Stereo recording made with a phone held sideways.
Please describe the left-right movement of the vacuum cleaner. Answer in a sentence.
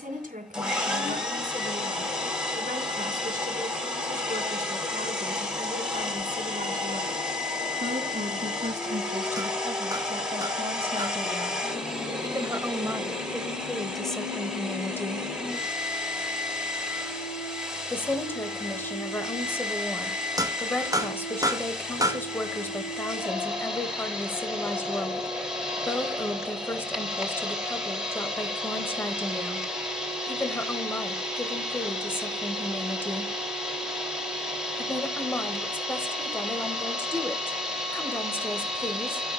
You can hear the vacuum cleaner stay put.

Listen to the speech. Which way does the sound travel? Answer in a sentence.
In this clip you hear the speech go from the right side to the left.